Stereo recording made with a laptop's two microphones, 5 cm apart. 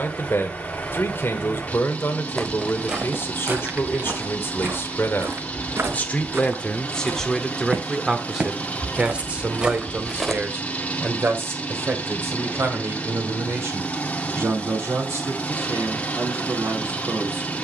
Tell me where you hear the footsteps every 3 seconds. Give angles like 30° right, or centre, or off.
10° right, 40° right, 40° right, 10° right, off, off.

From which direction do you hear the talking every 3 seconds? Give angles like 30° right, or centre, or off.
50° left, 50° left, 10° left, 40° right, 50° right, 60° right.